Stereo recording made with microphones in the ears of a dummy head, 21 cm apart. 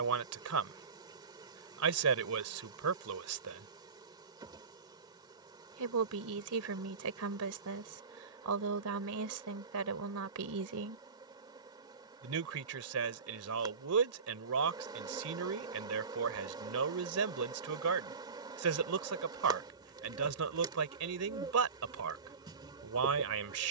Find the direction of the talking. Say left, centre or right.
right.